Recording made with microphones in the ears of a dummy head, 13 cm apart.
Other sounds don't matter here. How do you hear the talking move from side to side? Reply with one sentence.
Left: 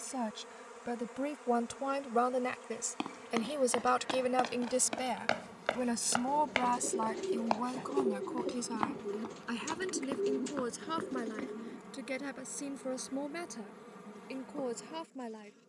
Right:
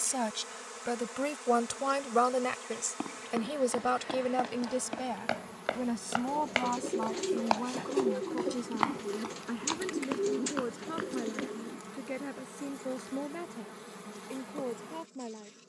In this clip you hear the talking move from right to left.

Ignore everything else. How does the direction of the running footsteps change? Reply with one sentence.
In this clip you hear the running footsteps go from the left side to the right.